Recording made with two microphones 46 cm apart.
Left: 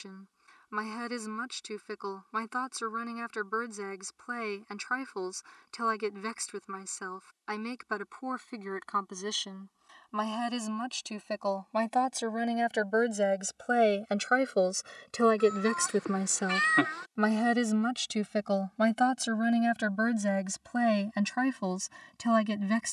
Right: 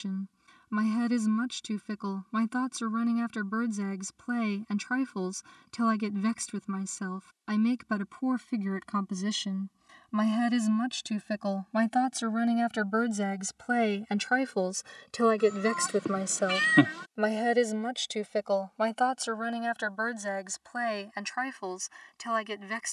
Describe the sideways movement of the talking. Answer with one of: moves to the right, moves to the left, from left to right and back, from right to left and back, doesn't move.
moves to the left.